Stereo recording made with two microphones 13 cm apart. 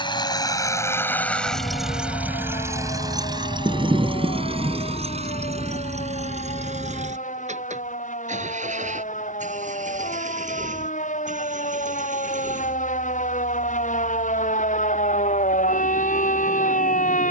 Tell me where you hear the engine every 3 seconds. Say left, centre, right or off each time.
centre, right, right, right, right, right.